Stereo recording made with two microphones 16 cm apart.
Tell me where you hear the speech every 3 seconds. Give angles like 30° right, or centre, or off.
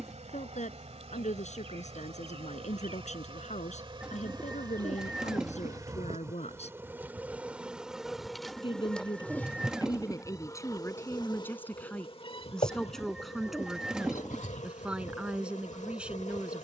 50° left, 50° left, 40° left, 20° left, centre, 10° right.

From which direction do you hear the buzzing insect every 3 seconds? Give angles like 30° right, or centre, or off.
40° right, 30° right, 10° right, 20° left, 40° left, 50° left.